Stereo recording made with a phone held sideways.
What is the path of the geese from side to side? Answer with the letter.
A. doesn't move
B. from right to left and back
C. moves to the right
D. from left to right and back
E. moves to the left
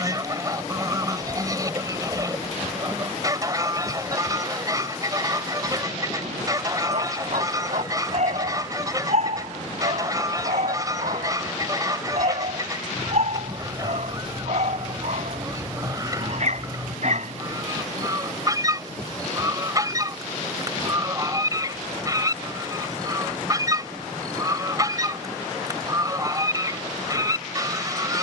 A.